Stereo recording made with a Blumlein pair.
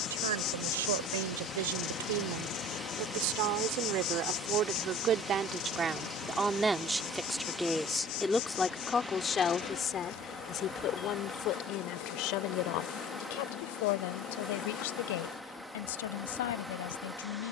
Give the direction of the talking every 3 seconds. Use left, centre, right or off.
right, right, centre, left, left, left.